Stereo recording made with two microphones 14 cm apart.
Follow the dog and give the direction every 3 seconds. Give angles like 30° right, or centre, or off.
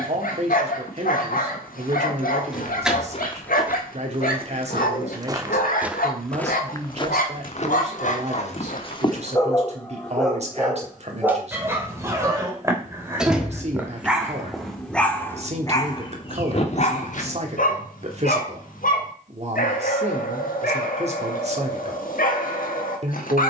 70° left, 70° left, 60° left, centre, 10° right, 40° left, 70° left, 70° left.